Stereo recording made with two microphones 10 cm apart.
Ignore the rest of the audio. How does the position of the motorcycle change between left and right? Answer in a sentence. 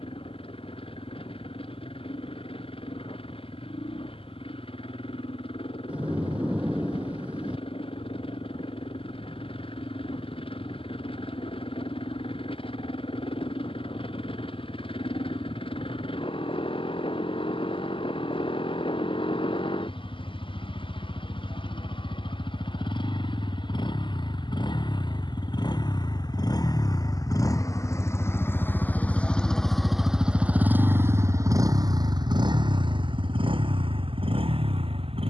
In this clip you hear the motorcycle travel towards the right.